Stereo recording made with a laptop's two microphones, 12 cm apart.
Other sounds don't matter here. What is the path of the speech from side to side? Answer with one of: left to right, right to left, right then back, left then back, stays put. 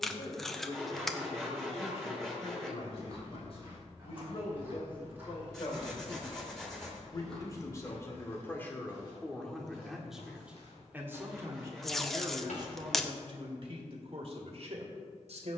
left to right.